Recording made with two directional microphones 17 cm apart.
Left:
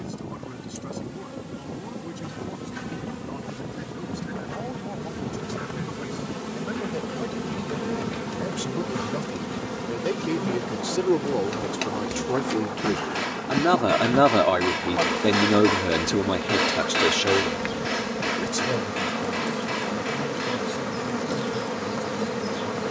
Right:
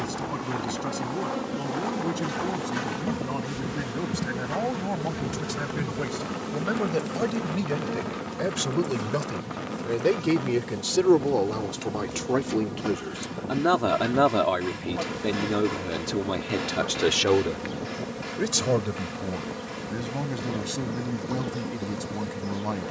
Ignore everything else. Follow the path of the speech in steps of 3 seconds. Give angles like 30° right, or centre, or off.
50° right, 40° right, 40° right, 20° right, 10° left, 20° left, 40° right, 50° right.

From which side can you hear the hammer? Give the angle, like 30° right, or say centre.
70° left.